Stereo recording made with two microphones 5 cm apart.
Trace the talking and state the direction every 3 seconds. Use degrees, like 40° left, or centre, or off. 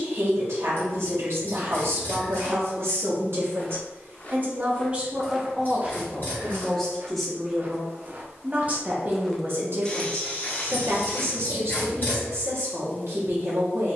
70° right, 30° right, 10° right, 60° right, 70° right.